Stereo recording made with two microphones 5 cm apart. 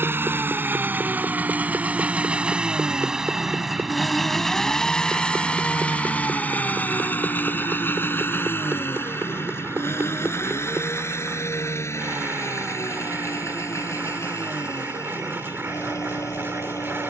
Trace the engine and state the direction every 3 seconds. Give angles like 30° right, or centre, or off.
30° right, 10° left, 40° left, 50° left, 60° left, 70° left.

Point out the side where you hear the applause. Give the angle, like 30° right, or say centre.
40° right.